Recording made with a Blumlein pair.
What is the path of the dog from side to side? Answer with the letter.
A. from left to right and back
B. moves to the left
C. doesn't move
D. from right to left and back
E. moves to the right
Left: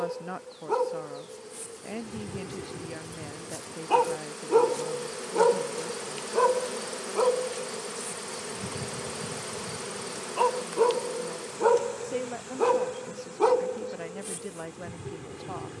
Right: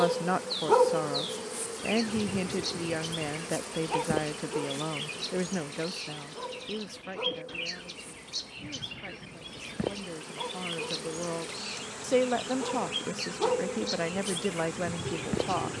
D.